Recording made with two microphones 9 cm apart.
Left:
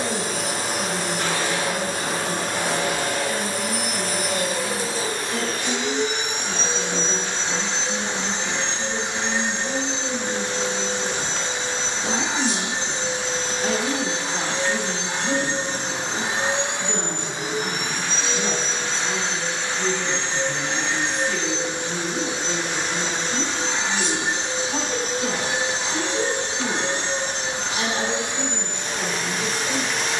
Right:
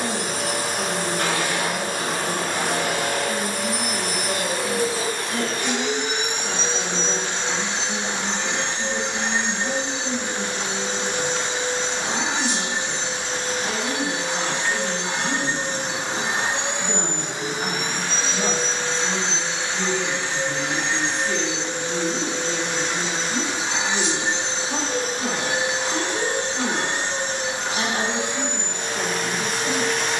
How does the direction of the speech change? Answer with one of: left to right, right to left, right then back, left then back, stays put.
left then back.